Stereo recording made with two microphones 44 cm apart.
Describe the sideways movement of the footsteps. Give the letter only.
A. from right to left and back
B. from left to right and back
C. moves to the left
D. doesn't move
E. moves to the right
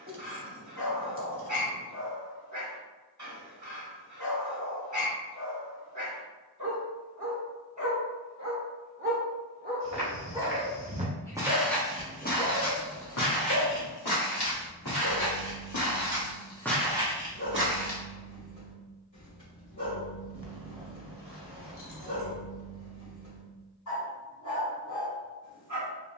A.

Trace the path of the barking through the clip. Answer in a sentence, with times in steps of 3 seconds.
You can hear the barking on the right from 0 s, in the centre from 9 s and on the left from 12 s.